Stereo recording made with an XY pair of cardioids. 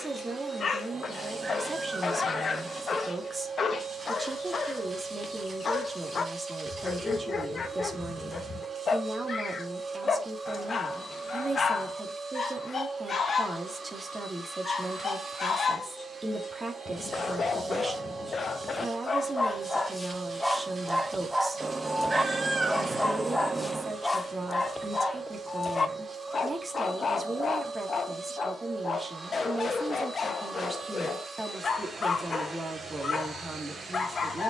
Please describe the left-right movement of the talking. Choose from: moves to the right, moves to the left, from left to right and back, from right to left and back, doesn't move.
doesn't move.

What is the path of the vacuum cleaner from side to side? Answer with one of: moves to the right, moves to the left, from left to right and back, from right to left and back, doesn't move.
doesn't move.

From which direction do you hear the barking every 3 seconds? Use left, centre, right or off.
left, left, left, left, left, left, left, centre, left, left, left, left.